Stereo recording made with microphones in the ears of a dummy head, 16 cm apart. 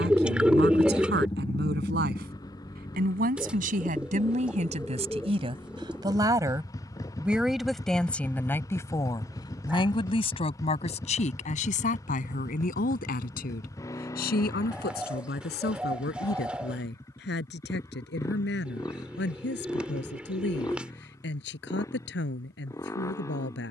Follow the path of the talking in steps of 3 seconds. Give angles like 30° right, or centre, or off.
60° right, 40° right, centre, 40° left, 50° left, 60° left, 70° left, 70° left.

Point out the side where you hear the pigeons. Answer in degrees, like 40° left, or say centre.
10° right.